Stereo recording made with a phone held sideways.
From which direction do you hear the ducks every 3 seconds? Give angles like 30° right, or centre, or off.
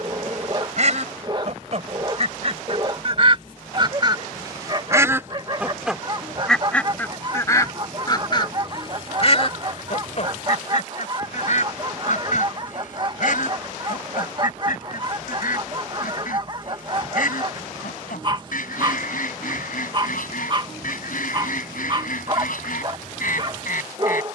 50° right, 30° right, 20° left, 50° left, 70° left, 70° left, 70° left, 70° left.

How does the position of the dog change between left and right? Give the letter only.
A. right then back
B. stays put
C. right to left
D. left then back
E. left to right
B.